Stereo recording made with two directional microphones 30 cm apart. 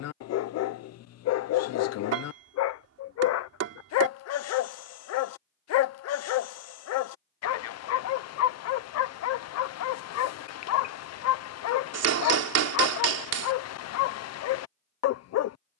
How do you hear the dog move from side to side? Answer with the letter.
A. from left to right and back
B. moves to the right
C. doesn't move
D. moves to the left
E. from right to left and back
C.